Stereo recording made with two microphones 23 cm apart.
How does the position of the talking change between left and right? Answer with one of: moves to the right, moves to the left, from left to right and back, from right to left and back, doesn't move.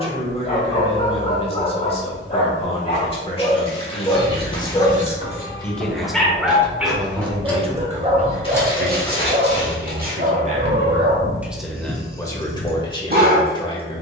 from left to right and back.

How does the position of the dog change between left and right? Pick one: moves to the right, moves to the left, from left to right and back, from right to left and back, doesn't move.
moves to the right.